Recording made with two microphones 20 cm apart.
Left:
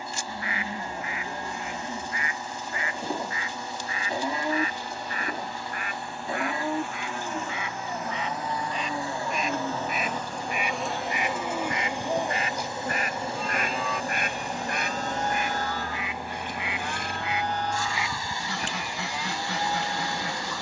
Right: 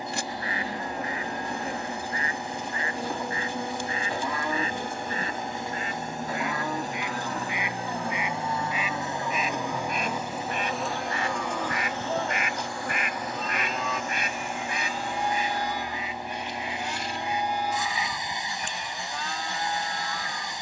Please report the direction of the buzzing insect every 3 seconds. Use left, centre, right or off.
right, right, right, centre, left, left, left.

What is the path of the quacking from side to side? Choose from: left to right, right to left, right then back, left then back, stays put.
right to left.